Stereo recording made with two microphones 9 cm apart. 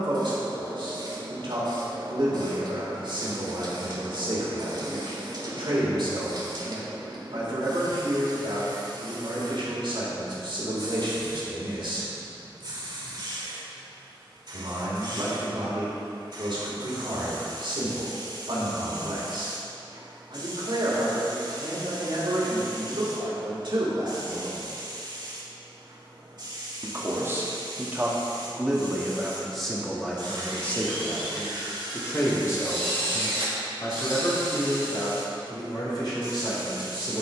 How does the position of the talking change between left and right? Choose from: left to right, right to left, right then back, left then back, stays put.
right to left.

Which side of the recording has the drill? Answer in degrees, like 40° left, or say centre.
80° right.